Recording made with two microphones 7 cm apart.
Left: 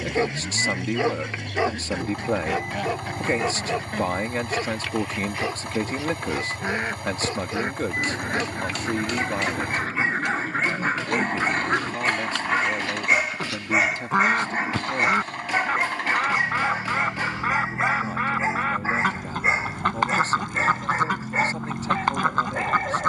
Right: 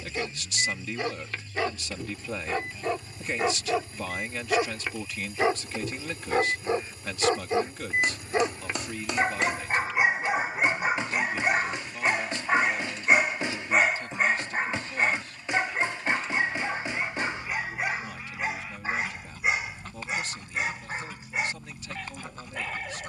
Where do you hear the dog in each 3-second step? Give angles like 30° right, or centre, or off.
20° left, 10° right, 30° right, 10° right, centre, 20° left, 30° left, 40° left.